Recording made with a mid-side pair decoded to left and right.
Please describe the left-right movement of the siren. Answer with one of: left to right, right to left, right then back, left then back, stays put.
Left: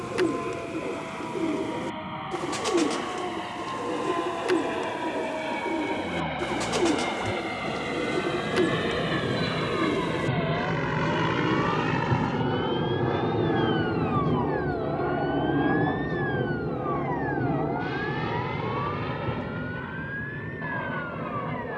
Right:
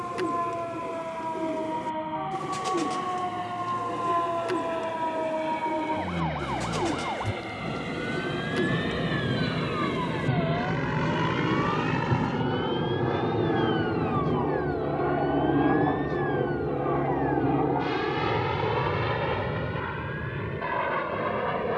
right to left.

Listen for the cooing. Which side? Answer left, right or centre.
left.